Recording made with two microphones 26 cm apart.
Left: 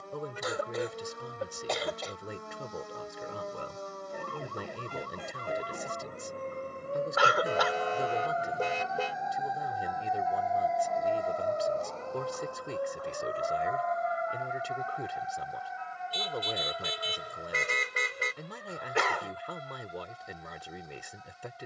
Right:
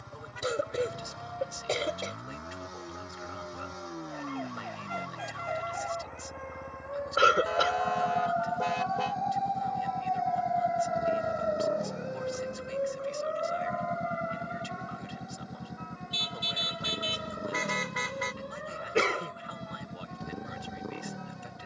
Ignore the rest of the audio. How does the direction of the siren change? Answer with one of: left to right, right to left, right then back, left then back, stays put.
left to right.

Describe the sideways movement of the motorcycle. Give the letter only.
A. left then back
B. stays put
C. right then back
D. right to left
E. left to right
B.